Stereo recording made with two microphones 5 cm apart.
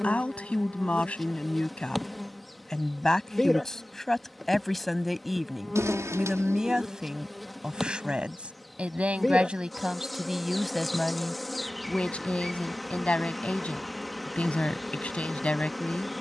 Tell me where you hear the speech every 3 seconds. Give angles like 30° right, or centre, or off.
20° left, 10° left, 10° right, 10° right, 30° left, 30° left.